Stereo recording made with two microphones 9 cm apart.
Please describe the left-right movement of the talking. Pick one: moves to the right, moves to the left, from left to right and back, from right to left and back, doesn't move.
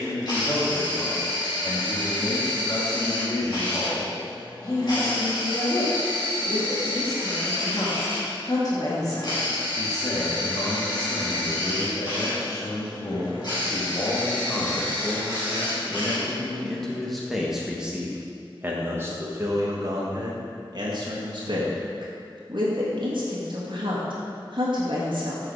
moves to the right.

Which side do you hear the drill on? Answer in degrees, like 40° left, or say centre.
50° left.